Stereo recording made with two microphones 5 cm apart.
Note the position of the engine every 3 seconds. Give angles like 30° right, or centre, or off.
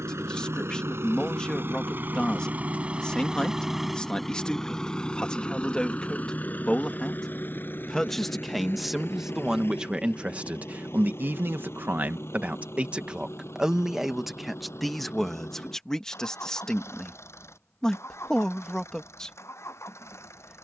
50° right, 10° left, 40° left, 50° left, 60° left, 60° left, 60° left.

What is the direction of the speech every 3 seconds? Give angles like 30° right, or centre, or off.
20° left, 20° left, 10° left, 30° right, 10° right, 10° left, 10° left.